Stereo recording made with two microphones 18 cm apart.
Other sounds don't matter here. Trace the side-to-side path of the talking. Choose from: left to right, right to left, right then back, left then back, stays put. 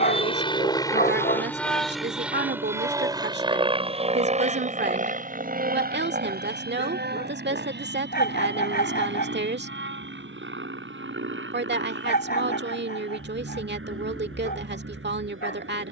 stays put.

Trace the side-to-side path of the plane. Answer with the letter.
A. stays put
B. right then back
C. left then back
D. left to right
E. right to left
D.